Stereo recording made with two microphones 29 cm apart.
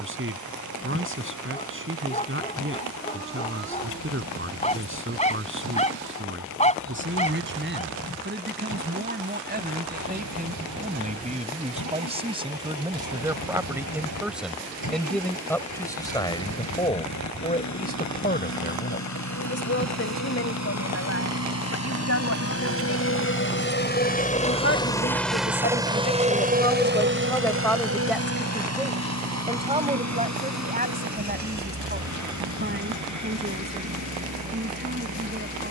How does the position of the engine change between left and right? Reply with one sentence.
In this clip you hear the engine go from the left side to the right.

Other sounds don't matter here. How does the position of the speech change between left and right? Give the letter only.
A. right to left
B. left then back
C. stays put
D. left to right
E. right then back
B.